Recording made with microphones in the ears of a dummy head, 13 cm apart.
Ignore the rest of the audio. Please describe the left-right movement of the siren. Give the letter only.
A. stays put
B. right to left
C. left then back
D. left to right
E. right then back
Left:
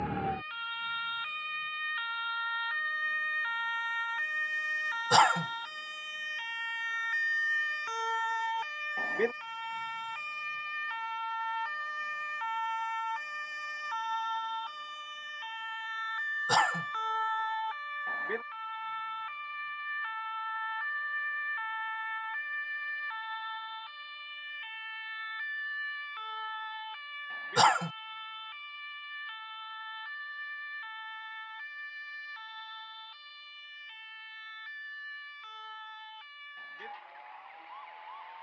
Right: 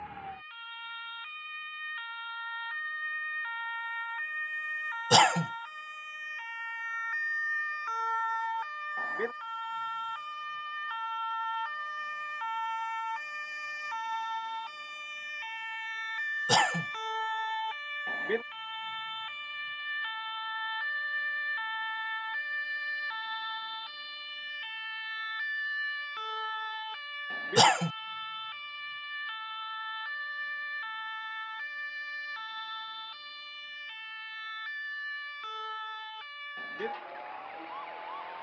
D.